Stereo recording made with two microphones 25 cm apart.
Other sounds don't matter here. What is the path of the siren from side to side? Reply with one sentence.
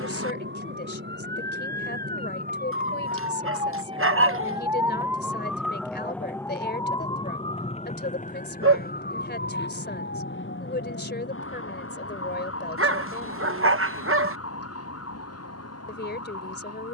In this clip you hear the siren travel towards the left.